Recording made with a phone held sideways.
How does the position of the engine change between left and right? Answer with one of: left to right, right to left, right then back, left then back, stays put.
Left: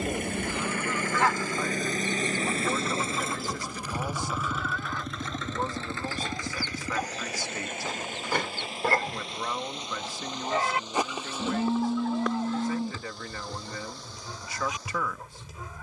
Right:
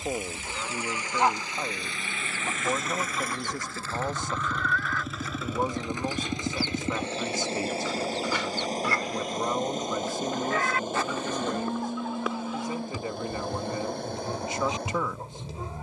left to right.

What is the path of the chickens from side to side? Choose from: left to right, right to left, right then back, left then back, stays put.
left then back.